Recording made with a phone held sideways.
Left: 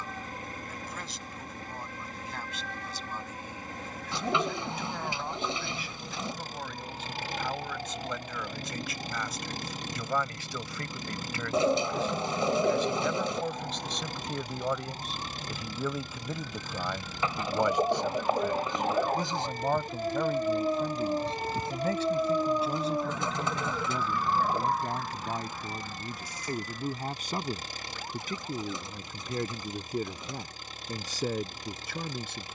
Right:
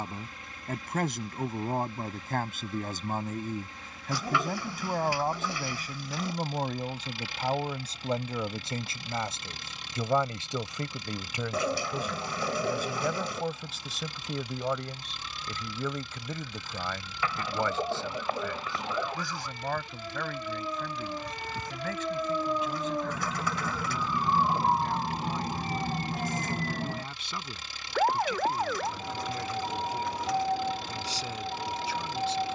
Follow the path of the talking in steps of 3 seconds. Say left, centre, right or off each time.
right, right, right, right, centre, centre, left, left, left, left, left.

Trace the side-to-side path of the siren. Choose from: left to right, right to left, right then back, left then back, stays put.
left to right.